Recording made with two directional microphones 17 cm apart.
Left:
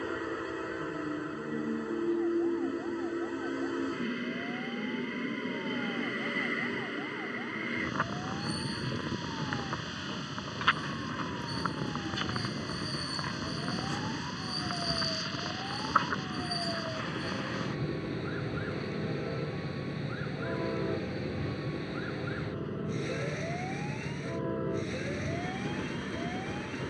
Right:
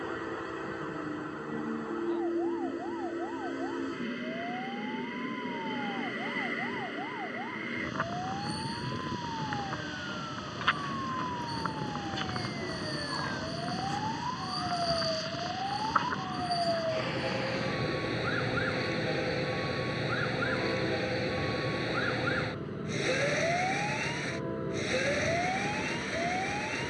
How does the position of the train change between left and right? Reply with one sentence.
You can hear the train stay put.